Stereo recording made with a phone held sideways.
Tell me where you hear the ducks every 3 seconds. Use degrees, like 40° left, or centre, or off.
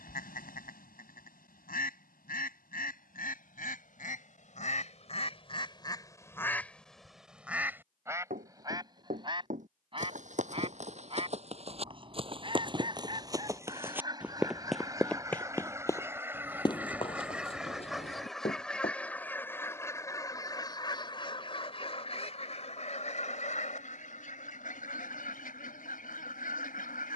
80° left, 50° left, centre, 40° right, 30° right, 10° right, 10° left, 50° left, 70° left.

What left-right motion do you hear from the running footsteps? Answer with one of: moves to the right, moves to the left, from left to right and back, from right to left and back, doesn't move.
moves to the left.